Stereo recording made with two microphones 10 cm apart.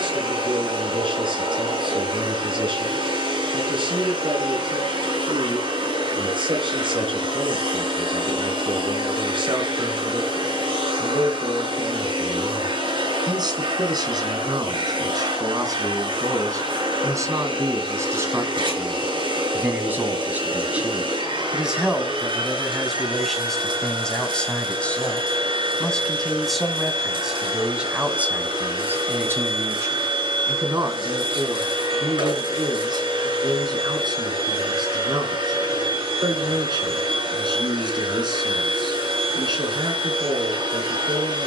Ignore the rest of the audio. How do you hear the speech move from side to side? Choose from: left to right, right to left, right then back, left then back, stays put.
left then back.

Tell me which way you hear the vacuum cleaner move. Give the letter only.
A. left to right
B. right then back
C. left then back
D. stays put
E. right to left
D.